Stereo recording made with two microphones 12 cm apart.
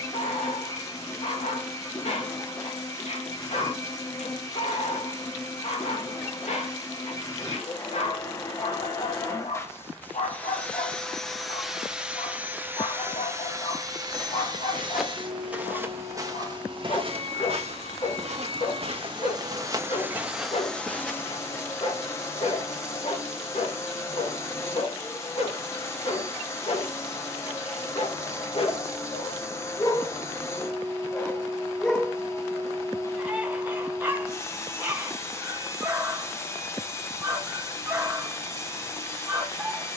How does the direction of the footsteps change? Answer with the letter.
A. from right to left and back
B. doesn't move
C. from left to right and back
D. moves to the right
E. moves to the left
C.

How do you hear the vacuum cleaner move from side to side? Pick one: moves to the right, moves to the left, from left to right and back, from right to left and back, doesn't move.
from left to right and back.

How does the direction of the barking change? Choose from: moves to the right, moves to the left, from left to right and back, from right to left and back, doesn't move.
moves to the right.